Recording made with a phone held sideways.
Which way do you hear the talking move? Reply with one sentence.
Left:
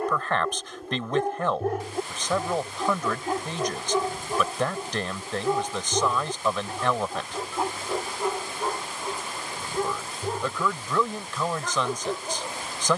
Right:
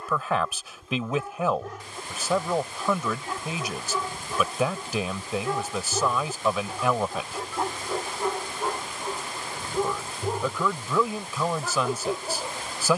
You can hear the talking stay in one place.